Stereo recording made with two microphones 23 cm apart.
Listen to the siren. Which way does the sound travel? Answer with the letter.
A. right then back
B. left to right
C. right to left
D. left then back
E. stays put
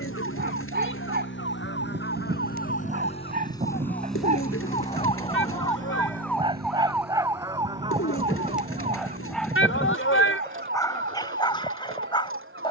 B.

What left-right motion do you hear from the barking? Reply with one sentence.
You can hear the barking travel towards the left.